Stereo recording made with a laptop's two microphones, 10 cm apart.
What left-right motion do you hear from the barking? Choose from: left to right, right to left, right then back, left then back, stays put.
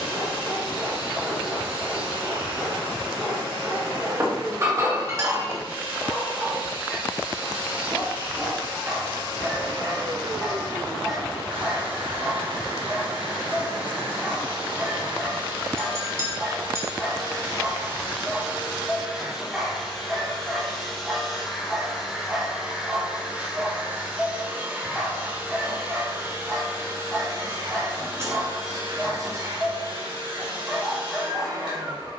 stays put.